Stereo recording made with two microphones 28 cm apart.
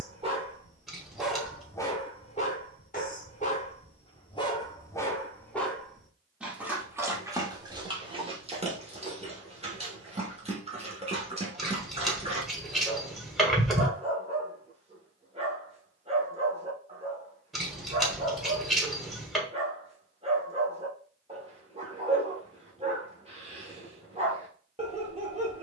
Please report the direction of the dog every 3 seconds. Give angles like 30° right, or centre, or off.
10° left, 20° left, 10° right, 20° right, 20° right, 20° right, 20° right, 20° right, 20° right.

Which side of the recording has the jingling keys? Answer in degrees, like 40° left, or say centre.
centre.